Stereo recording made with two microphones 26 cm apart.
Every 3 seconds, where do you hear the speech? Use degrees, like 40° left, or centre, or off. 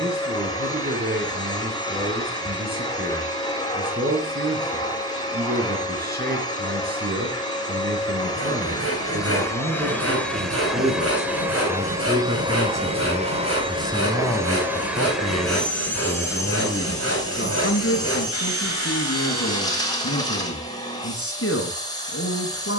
40° right, 40° right, 40° right, 30° right, centre, 40° left, 60° left, 60° left.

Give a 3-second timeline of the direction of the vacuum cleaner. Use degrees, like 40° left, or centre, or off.
20° left, 20° left, 20° left, centre, 20° right, 10° left, 20° left, 20° left.